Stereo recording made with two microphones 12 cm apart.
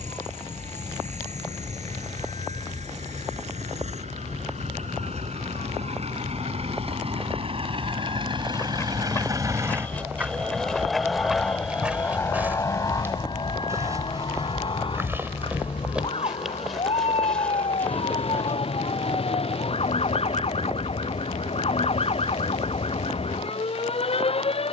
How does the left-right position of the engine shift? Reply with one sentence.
You can hear the engine move from right to left.